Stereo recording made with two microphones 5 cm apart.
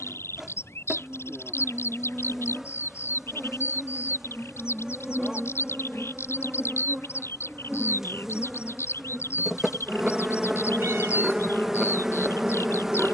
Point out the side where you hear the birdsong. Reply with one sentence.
You can hear the birdsong on the left.